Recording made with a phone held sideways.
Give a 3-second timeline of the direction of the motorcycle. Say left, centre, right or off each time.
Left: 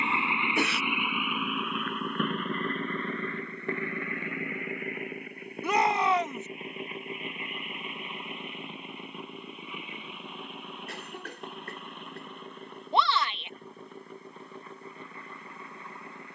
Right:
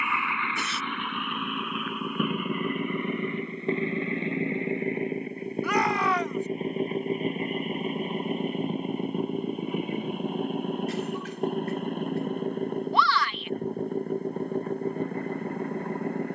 centre, right, right, right, right, right.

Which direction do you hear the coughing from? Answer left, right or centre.
left.